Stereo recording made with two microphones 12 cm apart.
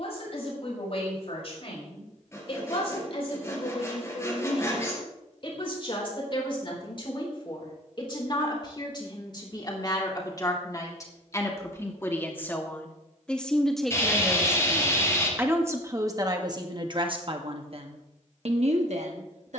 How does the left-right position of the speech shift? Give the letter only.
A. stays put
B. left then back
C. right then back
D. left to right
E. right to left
D.